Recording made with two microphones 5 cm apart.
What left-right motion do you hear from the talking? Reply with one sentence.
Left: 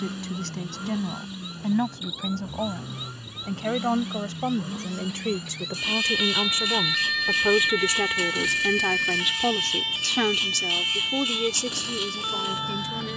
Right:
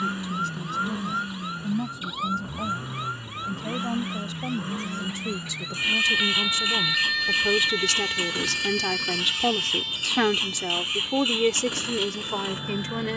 You can hear the talking go from the left side to the right.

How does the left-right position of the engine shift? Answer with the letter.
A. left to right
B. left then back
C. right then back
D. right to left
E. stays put
E.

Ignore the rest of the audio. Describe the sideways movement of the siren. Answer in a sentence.
In this clip you hear the siren move to the left.